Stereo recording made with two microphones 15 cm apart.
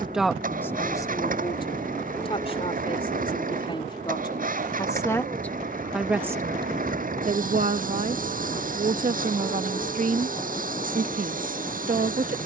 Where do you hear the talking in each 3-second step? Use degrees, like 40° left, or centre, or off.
20° left, 30° left, 50° right, 70° right.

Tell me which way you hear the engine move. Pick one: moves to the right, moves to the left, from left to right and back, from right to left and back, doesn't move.
doesn't move.